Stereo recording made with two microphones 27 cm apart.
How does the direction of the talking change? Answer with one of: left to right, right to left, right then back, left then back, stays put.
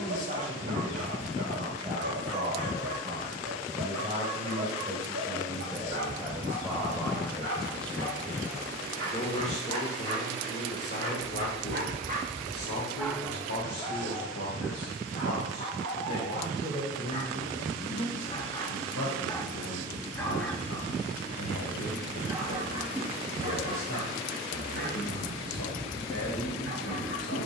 right to left.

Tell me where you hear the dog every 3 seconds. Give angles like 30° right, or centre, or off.
60° right, 60° right, 60° right, 60° right, 10° left, 30° left, 10° left, 20° right, 40° right.